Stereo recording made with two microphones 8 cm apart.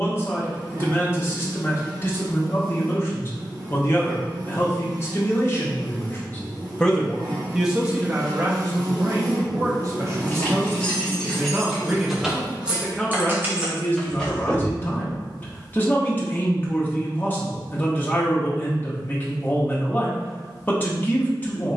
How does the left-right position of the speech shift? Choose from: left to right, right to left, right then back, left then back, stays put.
right then back.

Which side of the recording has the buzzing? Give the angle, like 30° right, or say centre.
50° right.